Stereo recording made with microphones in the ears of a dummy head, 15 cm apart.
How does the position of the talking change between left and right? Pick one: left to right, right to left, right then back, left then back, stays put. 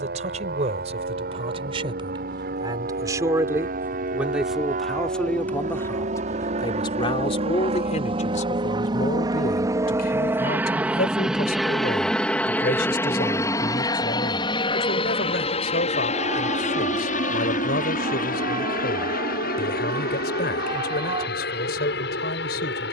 right to left.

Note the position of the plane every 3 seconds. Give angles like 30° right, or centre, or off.
60° right, 50° right, 40° right, 10° right, 20° left, 40° left, 50° left, 60° left.